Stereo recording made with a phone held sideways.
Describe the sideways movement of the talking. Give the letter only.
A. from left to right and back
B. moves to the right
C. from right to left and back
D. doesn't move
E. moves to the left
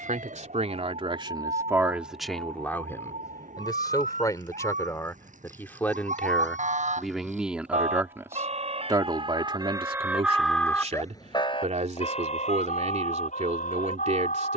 C.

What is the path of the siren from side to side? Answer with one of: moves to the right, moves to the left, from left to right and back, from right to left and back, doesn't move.
moves to the left.